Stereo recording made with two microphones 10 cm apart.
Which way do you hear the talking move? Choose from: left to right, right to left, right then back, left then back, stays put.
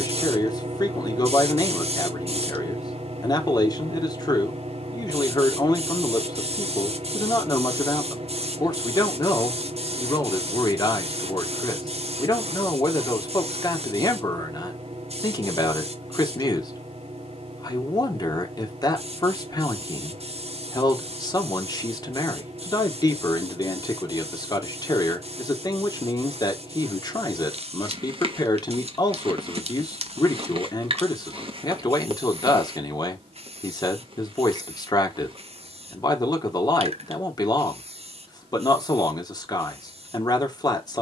stays put.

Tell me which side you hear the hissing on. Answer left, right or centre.
right.